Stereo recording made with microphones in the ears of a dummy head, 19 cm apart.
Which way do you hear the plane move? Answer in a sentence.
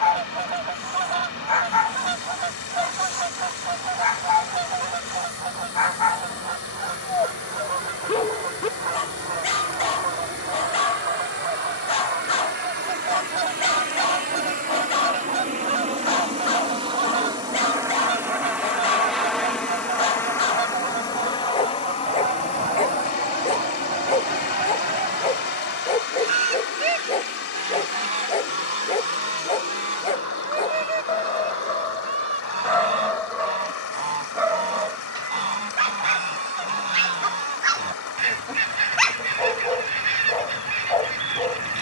You can hear the plane travel towards the left.